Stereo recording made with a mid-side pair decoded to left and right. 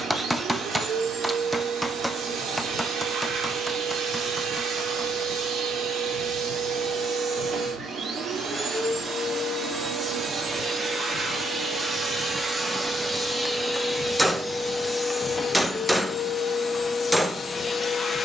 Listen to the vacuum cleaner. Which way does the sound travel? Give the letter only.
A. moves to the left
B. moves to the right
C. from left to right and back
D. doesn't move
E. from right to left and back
A.